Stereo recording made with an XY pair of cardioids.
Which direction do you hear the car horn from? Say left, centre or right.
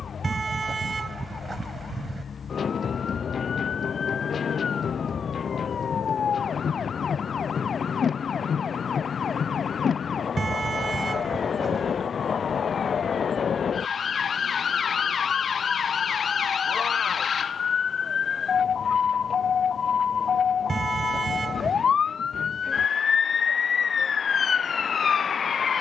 right.